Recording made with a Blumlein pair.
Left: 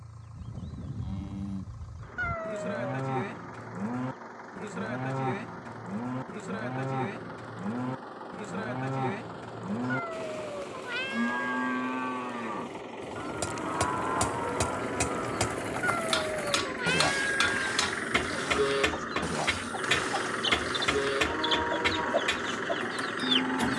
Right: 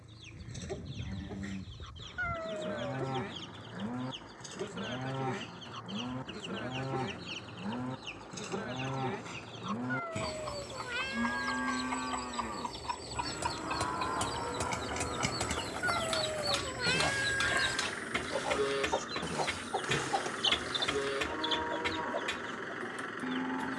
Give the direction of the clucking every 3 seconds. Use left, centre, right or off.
right, right, right, right, right, right, centre, left.